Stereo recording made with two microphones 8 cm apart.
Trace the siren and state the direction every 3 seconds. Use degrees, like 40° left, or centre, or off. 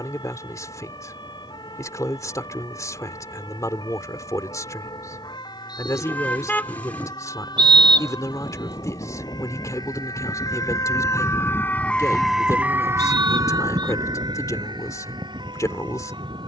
80° left, 80° left, 70° left, 50° left, 40° right, 80° right.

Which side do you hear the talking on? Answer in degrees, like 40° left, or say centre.
50° left.